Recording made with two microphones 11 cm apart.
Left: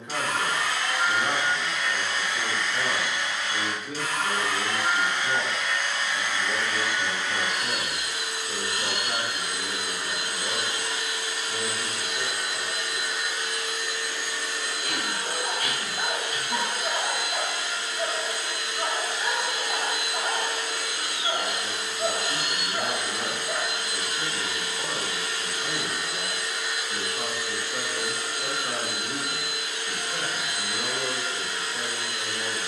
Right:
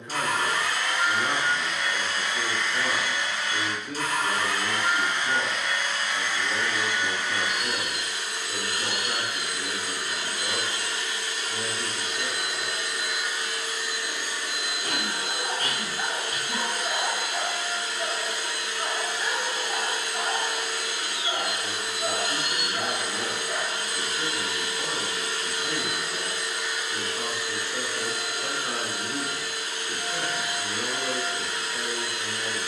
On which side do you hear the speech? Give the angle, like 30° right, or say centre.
10° left.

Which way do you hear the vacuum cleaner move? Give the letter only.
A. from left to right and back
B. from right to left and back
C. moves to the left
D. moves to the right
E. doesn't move
B.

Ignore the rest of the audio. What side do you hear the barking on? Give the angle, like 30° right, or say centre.
30° left.